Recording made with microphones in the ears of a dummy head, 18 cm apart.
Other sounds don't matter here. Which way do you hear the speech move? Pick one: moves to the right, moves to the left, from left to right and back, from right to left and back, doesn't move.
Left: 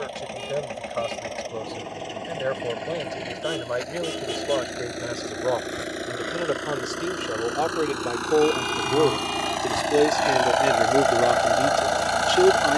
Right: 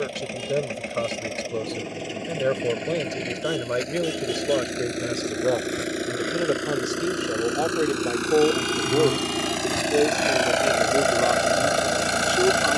moves to the left.